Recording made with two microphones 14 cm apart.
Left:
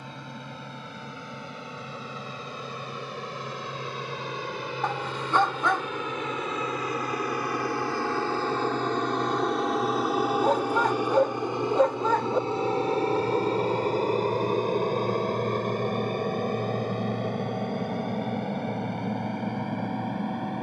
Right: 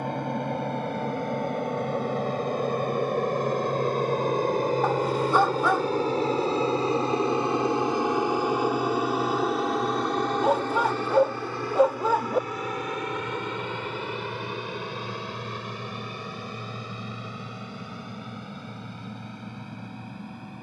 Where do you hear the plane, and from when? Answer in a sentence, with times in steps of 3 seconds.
You can hear the plane on the right from 0 s, in the centre from 9 s and on the left from 12 s.